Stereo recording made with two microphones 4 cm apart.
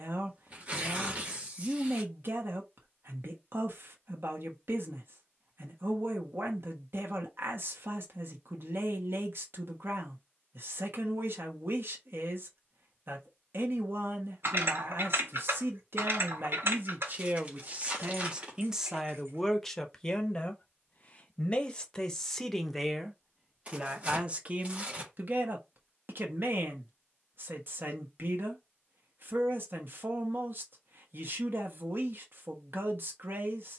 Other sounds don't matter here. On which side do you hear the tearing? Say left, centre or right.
right.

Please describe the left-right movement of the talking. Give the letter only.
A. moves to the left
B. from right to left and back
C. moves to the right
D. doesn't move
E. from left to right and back
B.